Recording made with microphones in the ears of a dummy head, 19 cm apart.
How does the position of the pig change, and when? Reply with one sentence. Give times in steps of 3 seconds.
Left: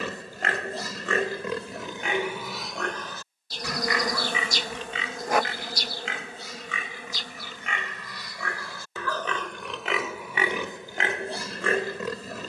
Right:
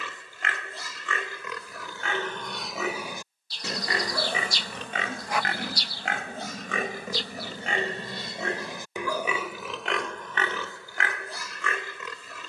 You can hear the pig on the left from 0 s, on the right from 3 s and in the centre from 9 s.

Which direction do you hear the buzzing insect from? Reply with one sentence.
In this clip you hear the buzzing insect on the left.